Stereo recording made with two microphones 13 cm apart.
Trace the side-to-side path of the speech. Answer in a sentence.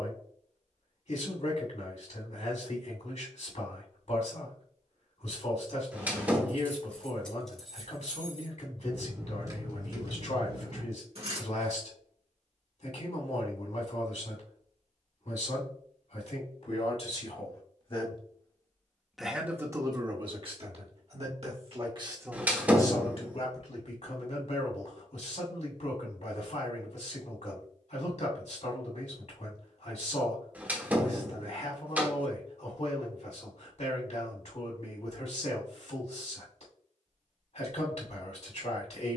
In this clip you hear the speech move from left to right and back again.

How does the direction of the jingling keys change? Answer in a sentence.
You can hear the jingling keys travel towards the right.